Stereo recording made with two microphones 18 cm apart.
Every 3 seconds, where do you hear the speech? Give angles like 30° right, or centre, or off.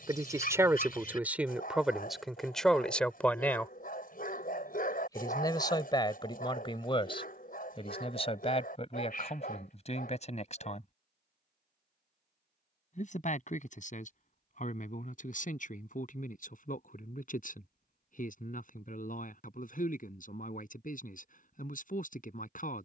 10° right, 20° left, 30° left, 40° left, 40° left, 50° left, 50° left, 50° left.